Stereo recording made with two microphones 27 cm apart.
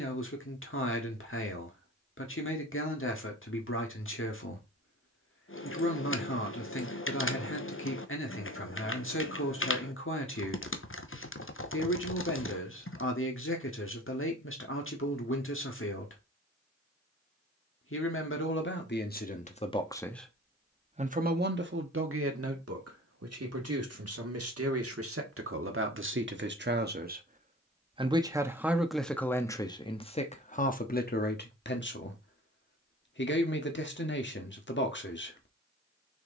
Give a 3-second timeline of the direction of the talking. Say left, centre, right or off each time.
left, left, left, left, left, left, left, right, right, centre, left, left.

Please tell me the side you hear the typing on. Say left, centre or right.
left.